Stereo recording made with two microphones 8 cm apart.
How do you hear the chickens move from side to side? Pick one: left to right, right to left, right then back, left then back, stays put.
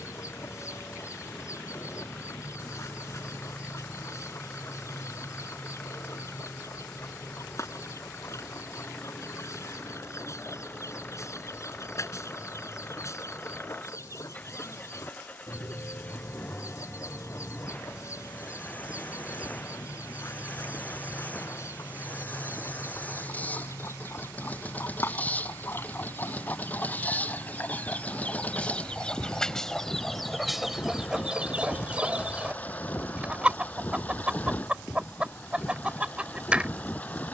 left to right.